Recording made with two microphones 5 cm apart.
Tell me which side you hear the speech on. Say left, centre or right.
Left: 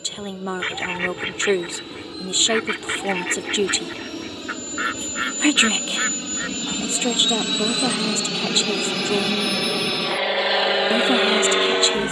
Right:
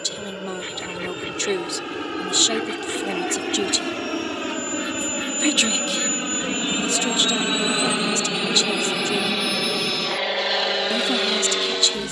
left.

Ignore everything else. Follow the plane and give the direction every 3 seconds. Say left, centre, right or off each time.
right, right, right, centre.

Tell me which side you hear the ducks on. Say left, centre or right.
left.